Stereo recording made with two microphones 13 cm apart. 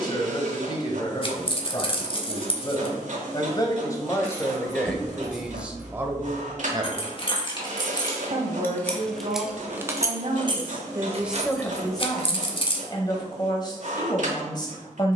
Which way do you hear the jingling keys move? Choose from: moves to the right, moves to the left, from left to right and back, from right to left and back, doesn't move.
moves to the right.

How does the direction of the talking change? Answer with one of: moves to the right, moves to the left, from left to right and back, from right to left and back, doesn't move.
from left to right and back.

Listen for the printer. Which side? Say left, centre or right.
right.